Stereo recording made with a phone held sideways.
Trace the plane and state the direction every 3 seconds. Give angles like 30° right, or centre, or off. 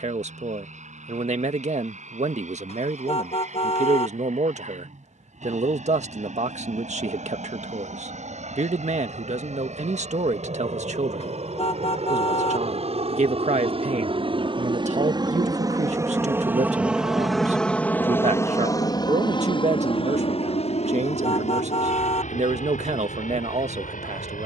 80° right, 80° right, 70° right, 70° right, 50° right, 10° right, 30° left, 60° left.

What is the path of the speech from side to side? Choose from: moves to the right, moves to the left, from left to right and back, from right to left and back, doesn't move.
doesn't move.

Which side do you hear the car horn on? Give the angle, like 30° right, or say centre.
50° left.